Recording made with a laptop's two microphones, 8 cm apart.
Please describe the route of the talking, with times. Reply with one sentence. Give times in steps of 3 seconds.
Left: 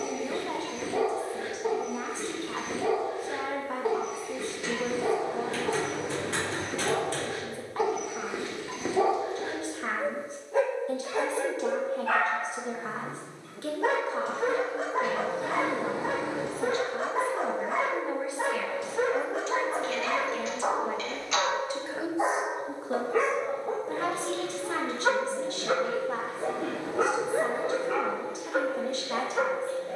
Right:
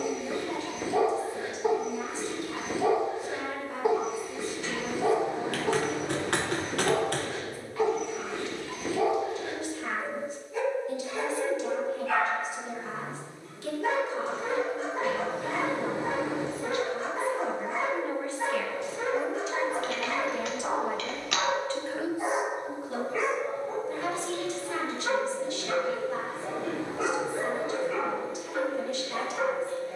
In this clip you hear the talking on the left from 0 s, in the centre from 18 s and on the left from 21 s.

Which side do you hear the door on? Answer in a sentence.
You can hear the door in the centre.